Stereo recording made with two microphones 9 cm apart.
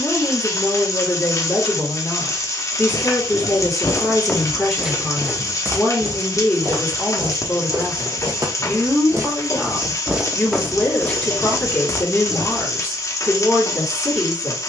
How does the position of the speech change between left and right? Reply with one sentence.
In this clip you hear the speech stay put.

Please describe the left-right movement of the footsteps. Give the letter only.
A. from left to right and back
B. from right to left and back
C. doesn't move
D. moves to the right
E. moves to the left
A.